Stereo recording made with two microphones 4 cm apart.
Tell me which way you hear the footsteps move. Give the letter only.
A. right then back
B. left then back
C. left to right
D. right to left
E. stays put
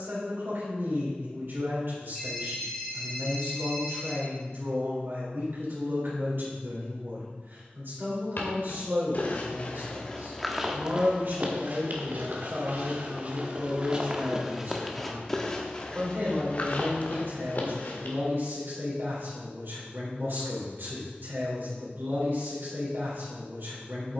A.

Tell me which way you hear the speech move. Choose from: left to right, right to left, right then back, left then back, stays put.
stays put.